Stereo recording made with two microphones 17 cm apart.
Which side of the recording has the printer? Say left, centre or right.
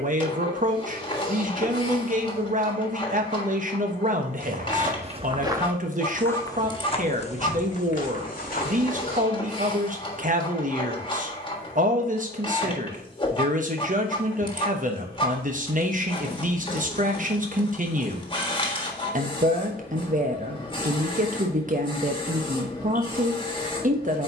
left.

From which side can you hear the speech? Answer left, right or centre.
right.